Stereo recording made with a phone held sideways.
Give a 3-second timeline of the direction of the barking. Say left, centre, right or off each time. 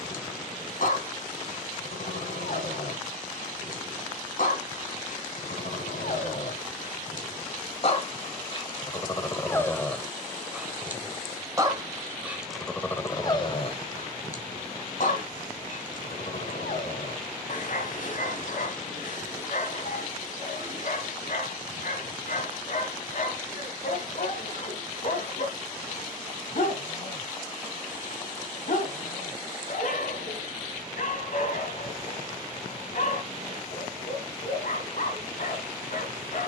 left, left, left, centre, left, left, left, left, left, left, left, left.